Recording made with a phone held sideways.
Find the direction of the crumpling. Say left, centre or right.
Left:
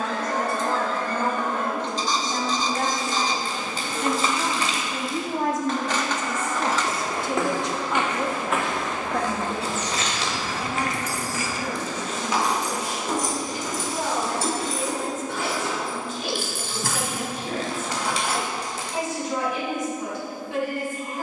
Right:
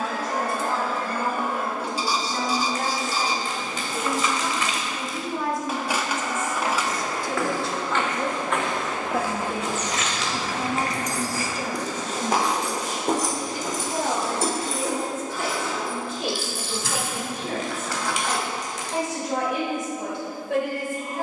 left.